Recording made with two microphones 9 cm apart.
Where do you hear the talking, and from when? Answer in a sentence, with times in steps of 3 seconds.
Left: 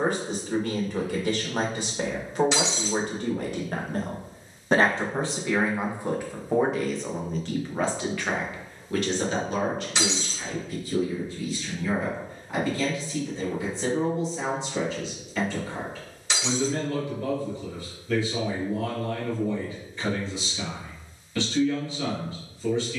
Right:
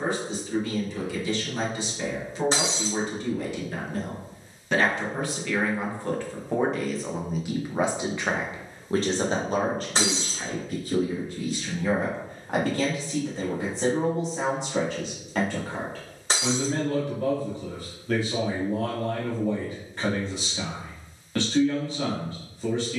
In this clip you hear the talking on the left from 0 s, in the centre from 6 s and on the right from 9 s.